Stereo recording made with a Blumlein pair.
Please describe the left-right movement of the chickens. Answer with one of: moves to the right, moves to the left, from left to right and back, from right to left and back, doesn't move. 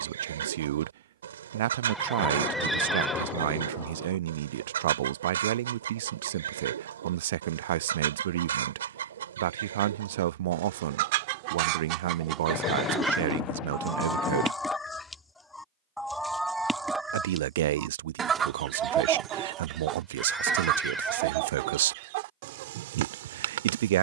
from right to left and back.